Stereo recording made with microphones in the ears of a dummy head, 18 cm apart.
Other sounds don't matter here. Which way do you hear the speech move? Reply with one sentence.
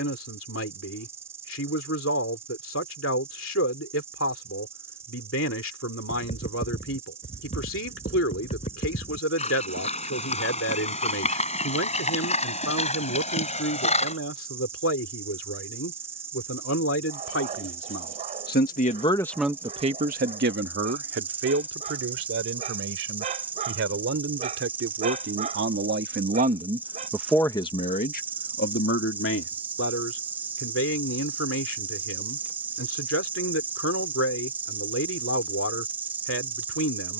In this clip you hear the speech go right and come back.